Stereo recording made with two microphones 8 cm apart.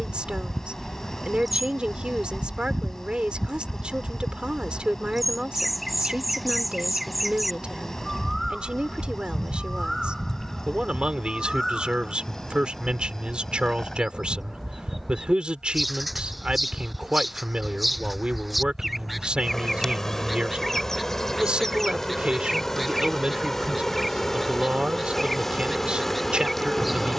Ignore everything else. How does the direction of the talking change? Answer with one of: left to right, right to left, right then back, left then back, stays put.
stays put.